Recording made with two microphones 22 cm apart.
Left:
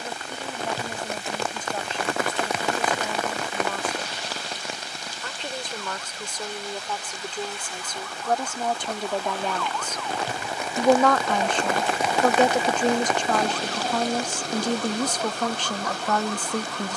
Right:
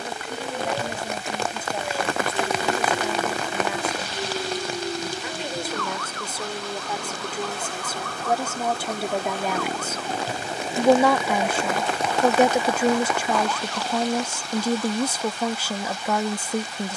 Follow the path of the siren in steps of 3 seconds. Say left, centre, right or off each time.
right, right, right, right, left, left.